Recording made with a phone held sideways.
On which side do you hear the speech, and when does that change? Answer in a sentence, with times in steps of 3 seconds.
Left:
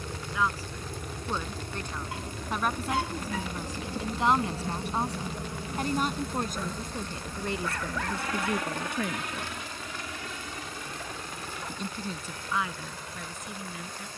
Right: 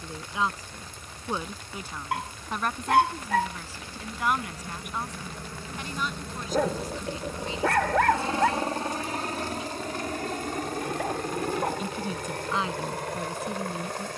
In this clip you hear the speech in the centre from 0 s, on the left from 3 s and on the right from 12 s.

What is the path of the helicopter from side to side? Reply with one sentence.
You can hear the helicopter go from the left side to the right.